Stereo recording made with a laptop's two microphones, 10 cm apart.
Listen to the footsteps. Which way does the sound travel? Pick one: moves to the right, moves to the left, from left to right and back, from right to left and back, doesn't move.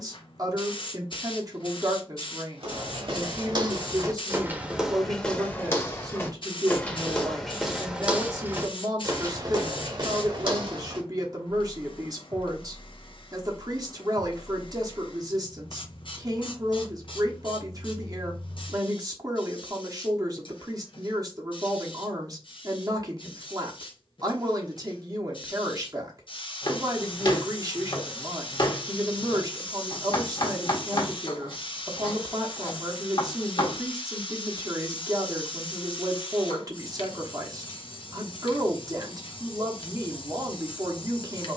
from right to left and back.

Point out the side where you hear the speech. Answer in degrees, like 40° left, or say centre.
40° right.